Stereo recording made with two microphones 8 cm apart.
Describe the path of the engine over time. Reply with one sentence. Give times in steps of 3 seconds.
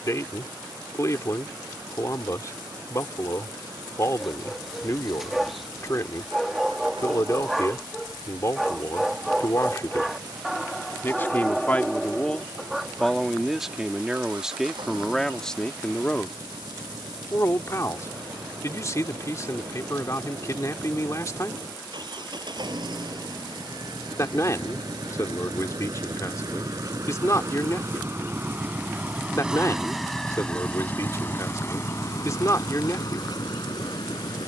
You can hear the engine on the right from 0 s and on the left from 30 s.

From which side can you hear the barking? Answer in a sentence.
You can hear the barking in the centre.